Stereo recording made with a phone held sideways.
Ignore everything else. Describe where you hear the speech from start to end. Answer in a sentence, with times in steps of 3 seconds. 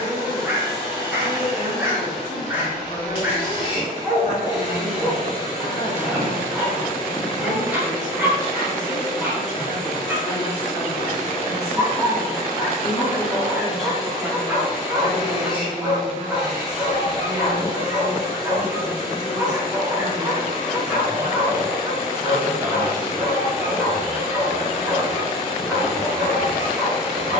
You can hear the speech on the left from 0 s, in the centre from 12 s and on the right from 15 s.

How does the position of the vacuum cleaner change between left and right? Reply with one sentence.
You can hear the vacuum cleaner stay put.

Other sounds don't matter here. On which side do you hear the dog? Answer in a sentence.
You can hear the dog in the centre.